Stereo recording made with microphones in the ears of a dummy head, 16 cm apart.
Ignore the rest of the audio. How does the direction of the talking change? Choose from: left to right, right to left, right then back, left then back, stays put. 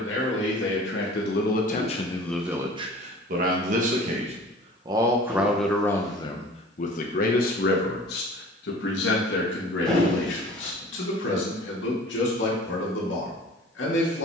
right then back.